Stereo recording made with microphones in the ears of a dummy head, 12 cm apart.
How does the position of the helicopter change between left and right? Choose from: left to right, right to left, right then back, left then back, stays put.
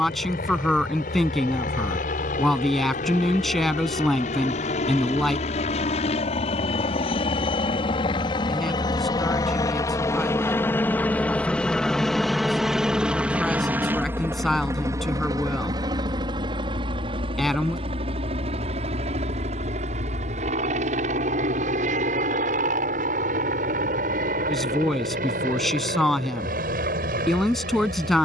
left to right.